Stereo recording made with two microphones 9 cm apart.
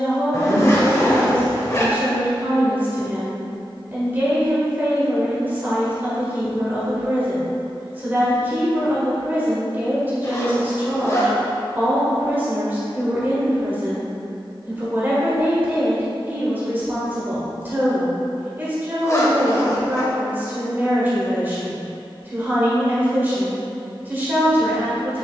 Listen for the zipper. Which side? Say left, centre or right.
left.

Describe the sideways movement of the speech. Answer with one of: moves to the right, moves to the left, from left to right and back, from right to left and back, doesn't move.
doesn't move.